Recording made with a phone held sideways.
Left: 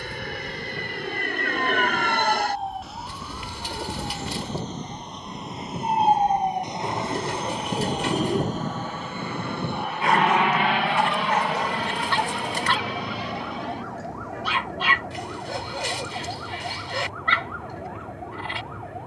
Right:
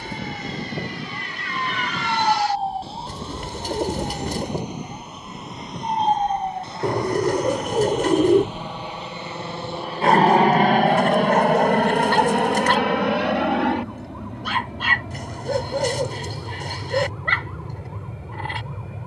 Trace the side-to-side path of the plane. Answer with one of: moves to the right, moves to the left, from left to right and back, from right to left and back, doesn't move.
moves to the right.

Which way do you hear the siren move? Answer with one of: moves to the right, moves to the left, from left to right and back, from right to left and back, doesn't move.
moves to the left.